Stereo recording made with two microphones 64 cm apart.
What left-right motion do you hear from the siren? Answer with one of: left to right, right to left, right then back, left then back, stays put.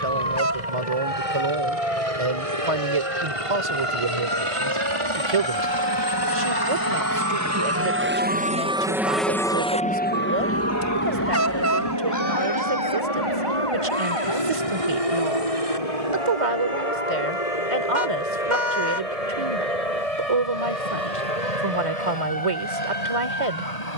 right to left.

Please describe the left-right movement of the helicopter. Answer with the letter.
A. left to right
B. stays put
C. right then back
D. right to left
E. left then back
D.